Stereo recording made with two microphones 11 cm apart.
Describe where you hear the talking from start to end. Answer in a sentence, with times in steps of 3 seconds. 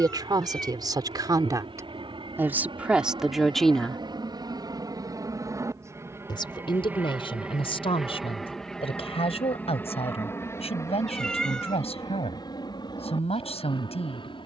In this clip you hear the talking on the right from 0 s, in the centre from 3 s and on the left from 6 s.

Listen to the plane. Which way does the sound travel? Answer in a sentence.
You can hear the plane travel towards the left.